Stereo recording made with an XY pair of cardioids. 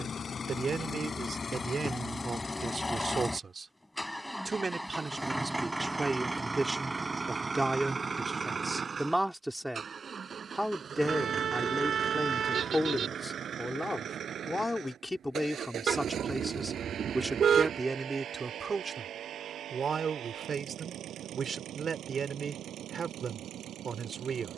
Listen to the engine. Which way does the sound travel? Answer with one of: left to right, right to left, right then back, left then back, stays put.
left to right.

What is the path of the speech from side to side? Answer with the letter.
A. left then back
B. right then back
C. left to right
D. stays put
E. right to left
A.